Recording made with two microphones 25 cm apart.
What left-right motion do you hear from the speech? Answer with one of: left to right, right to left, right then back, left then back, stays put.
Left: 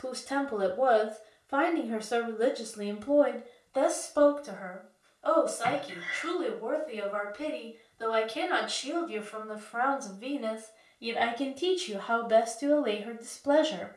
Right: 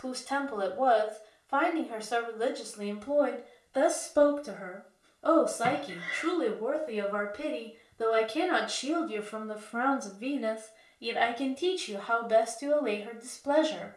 right then back.